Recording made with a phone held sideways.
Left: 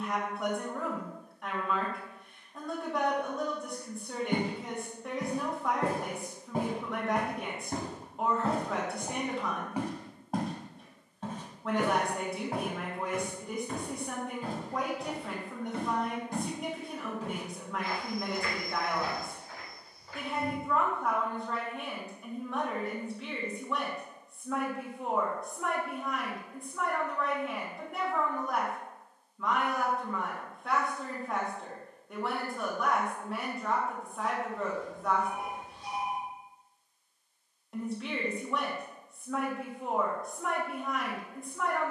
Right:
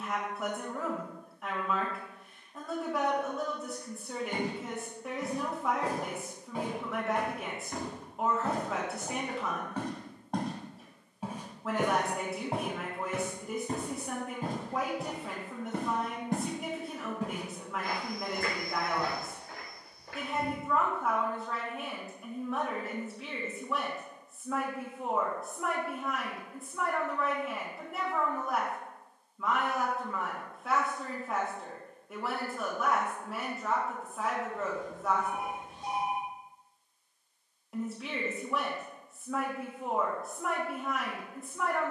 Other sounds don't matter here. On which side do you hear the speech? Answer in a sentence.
You can hear the speech in the centre.